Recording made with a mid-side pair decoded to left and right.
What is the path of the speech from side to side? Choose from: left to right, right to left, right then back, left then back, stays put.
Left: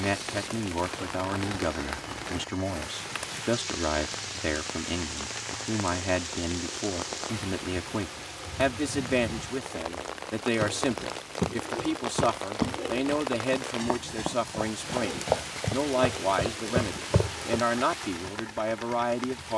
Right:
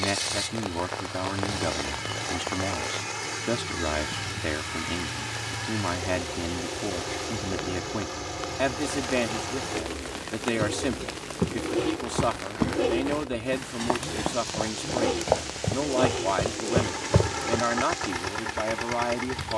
stays put.